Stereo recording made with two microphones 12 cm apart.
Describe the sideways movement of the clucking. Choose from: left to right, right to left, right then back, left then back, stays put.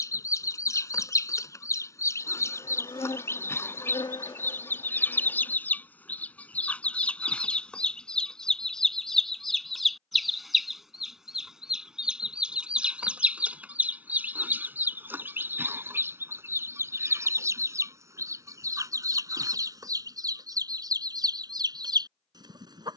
left to right.